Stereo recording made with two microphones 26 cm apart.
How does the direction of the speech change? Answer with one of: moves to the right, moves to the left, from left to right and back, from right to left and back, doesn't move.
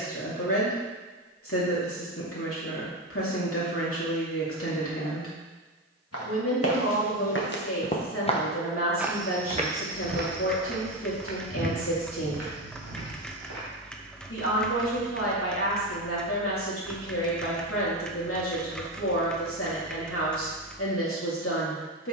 doesn't move.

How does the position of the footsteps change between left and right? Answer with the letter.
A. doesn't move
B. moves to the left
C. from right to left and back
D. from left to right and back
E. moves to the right
E.